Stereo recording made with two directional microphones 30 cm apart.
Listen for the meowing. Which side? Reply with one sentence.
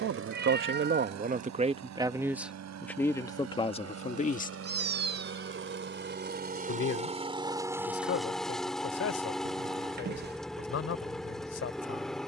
In this clip you hear the meowing on the right.